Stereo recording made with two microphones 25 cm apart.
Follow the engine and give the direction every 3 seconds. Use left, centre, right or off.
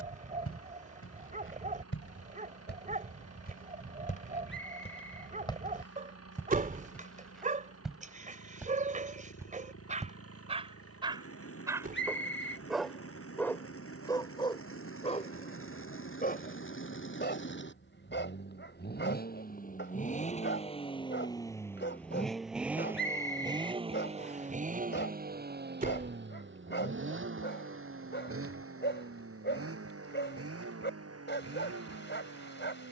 left, left, left, left, left, left, left, centre, right, right, right.